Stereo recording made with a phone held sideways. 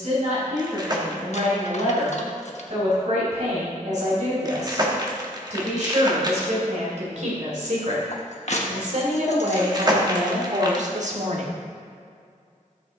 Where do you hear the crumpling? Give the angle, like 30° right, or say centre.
30° right.